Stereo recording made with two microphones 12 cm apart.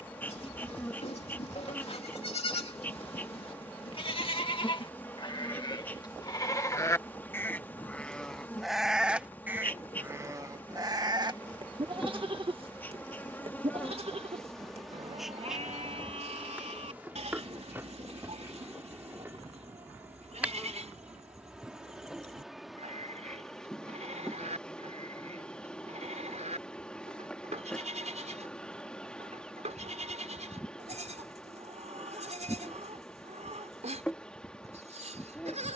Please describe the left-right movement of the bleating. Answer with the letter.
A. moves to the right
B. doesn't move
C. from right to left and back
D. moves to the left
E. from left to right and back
A.